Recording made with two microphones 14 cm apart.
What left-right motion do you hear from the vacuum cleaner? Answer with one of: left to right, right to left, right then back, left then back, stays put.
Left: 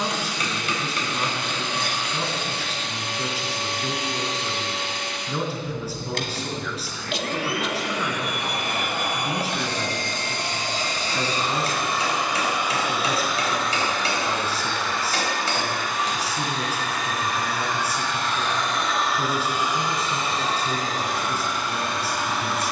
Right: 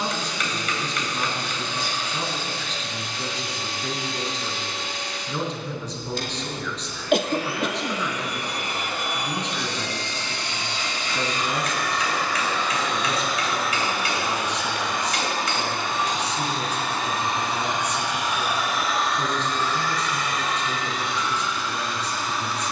right then back.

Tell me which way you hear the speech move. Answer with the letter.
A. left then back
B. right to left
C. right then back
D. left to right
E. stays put
E.